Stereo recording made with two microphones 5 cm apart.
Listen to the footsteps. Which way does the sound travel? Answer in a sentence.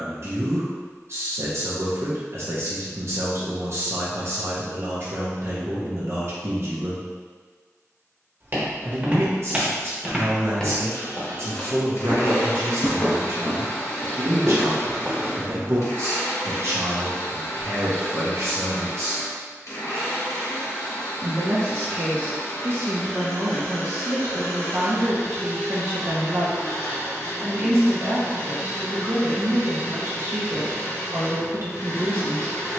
In this clip you hear the footsteps move from right to left and back again.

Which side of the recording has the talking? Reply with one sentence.
In this clip you hear the talking on the right.